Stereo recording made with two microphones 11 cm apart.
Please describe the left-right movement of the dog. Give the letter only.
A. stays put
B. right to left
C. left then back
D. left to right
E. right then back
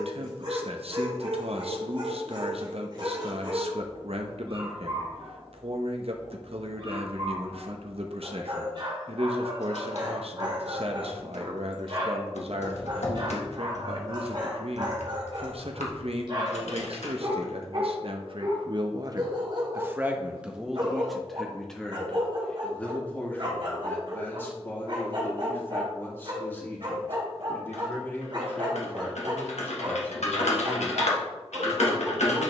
A.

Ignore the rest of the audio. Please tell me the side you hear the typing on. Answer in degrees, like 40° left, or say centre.
80° left.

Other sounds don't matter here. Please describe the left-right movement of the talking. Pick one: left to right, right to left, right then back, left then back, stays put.
right to left.